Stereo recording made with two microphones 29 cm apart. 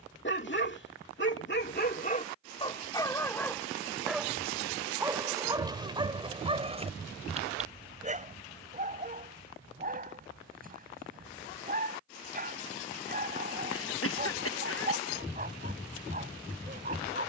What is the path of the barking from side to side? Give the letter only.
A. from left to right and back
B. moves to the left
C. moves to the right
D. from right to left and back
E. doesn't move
C.